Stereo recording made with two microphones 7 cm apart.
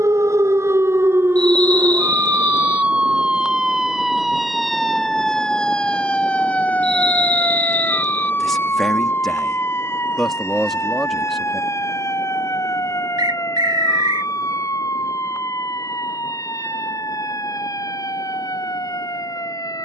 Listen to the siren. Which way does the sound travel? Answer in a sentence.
In this clip you hear the siren move to the left.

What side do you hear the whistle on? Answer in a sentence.
You can hear the whistle on the right.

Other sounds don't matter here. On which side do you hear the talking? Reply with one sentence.
In this clip you hear the talking in the centre.